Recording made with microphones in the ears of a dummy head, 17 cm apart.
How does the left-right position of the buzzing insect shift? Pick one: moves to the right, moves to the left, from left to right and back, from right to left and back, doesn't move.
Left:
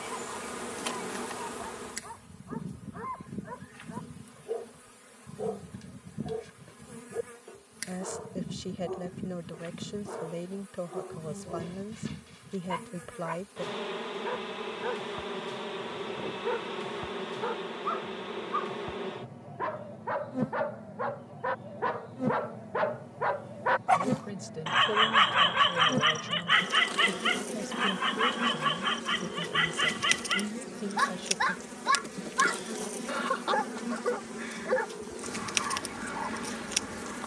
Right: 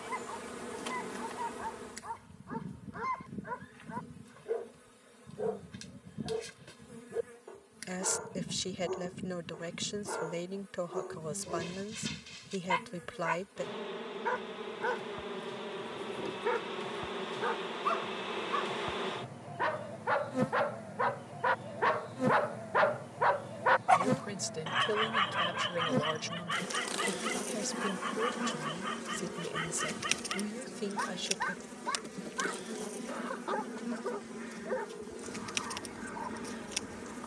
from left to right and back.